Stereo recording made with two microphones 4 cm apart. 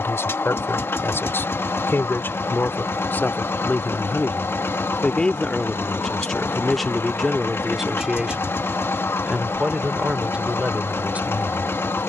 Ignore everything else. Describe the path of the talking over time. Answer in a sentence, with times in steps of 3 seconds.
In this clip you hear the talking on the left from 0 s, in the centre from 6 s and on the right from 9 s.